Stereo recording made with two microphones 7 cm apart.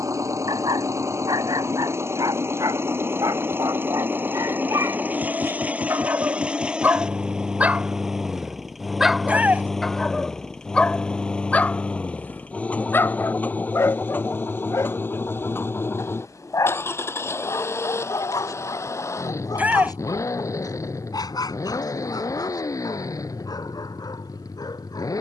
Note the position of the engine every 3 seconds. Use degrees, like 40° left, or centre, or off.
40° right, 20° right, 10° right, 10° left, 20° left, 30° left, 40° left, 50° left, 50° left.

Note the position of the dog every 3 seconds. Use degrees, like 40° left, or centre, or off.
60° right, 50° right, 20° right, 10° left, 30° left, 50° left, 50° left, 60° left, 60° left.